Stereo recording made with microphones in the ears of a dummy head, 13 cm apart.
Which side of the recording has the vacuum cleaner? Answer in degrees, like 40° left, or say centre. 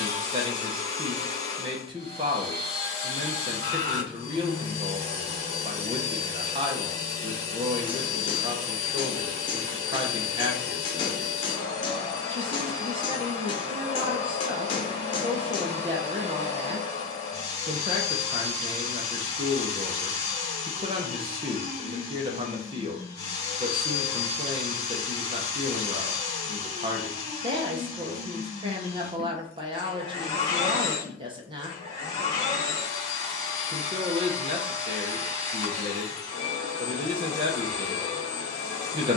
30° left.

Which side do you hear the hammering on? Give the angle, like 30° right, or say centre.
30° left.